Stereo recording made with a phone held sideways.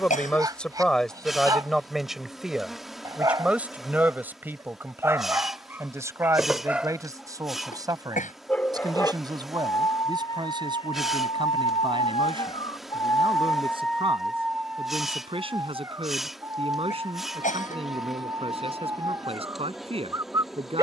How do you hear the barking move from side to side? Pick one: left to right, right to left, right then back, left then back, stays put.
left then back.